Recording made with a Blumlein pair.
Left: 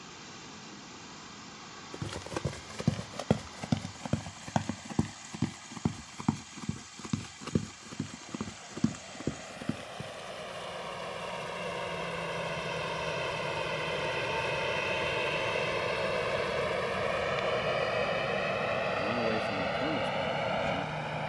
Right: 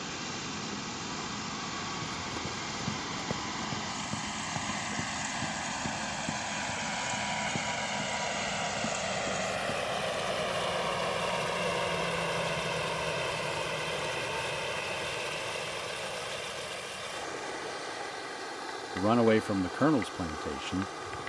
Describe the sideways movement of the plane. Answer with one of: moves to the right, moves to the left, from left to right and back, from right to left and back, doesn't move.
moves to the left.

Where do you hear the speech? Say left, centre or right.
right.